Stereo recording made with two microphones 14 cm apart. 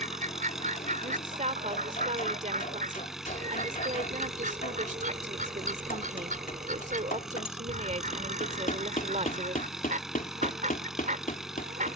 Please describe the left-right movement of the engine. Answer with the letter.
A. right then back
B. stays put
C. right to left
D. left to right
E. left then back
B.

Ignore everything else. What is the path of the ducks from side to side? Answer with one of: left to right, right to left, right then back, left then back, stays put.
stays put.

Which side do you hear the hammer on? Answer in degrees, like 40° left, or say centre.
70° left.